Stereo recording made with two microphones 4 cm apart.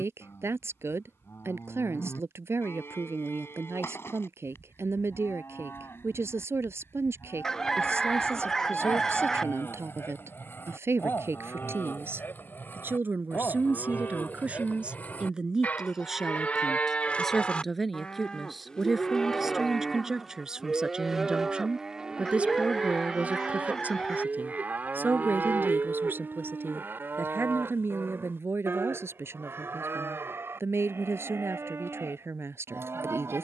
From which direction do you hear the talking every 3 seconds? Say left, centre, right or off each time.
right, right, right, right, right, centre, centre, right, right, right, right.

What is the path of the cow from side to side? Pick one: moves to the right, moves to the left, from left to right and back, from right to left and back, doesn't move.
moves to the right.